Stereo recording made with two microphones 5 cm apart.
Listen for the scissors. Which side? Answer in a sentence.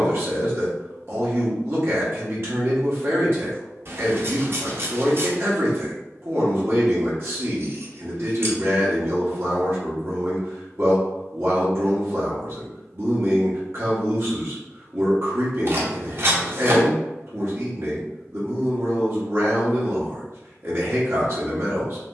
You can hear the scissors on the right.